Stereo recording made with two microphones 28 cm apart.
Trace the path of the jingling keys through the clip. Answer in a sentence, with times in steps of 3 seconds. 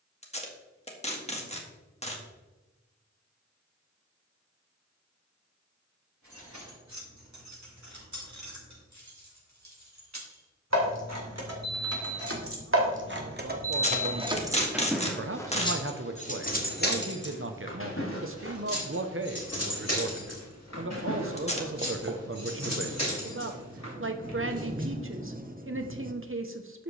In this clip you hear the jingling keys not at all from 0 s, on the right from 6 s and on the left from 15 s.